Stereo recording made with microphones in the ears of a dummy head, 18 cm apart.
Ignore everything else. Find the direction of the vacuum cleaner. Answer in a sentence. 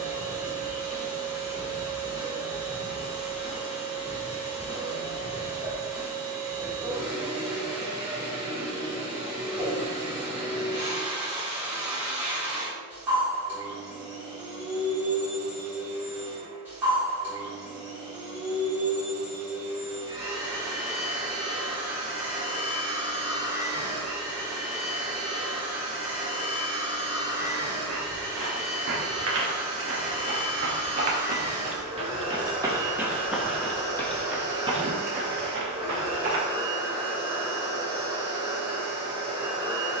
In this clip you hear the vacuum cleaner in the centre.